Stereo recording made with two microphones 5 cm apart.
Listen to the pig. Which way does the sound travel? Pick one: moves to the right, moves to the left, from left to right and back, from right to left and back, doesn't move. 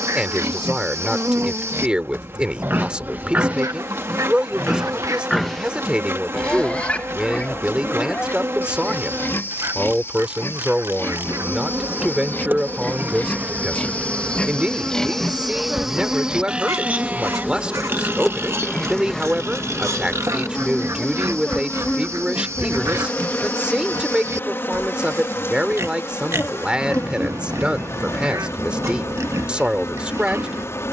from right to left and back.